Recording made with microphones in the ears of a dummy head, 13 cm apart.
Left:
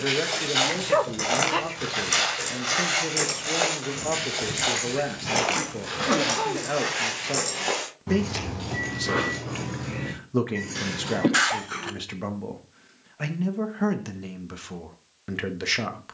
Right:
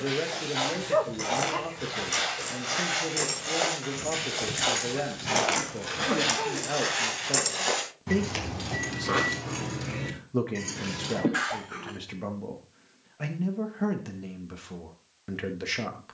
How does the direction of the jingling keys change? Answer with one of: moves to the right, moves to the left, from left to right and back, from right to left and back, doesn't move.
moves to the right.